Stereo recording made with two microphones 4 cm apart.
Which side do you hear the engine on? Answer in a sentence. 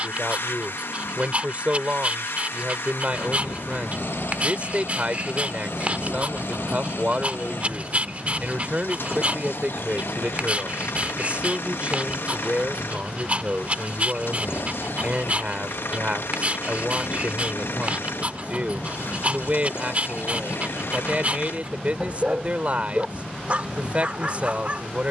You can hear the engine on the left.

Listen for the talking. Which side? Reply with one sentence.
You can hear the talking on the right.